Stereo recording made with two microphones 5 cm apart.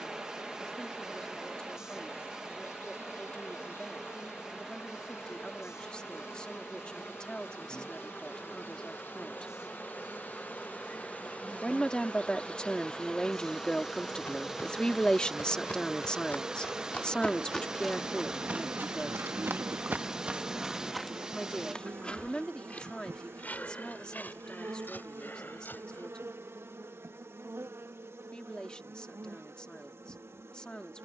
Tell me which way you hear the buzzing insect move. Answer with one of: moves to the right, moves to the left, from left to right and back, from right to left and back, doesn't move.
moves to the right.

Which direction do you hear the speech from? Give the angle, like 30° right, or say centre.
20° left.